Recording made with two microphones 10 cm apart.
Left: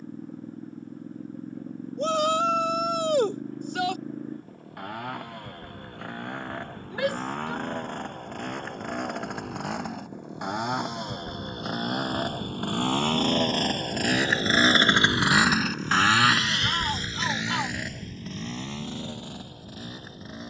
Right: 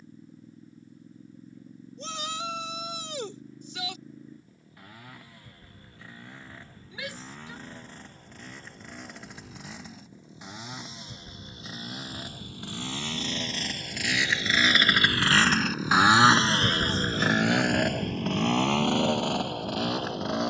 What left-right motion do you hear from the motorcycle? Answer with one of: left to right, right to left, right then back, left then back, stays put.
left to right.